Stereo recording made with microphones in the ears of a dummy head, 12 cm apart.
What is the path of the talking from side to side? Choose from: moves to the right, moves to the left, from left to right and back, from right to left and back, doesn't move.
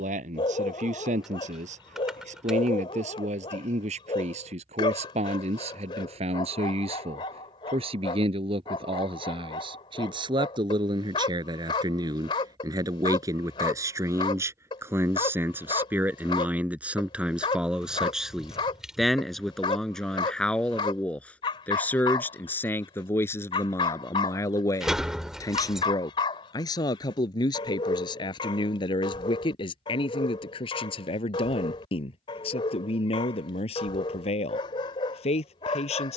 moves to the left.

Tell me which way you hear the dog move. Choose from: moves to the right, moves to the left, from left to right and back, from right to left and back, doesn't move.
doesn't move.